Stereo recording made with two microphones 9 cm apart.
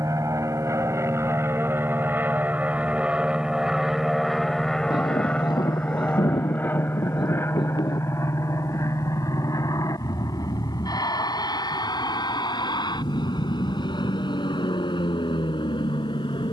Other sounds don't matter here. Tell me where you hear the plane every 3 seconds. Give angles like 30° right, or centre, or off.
30° right, centre, 30° left, 40° left, 50° left, 60° left.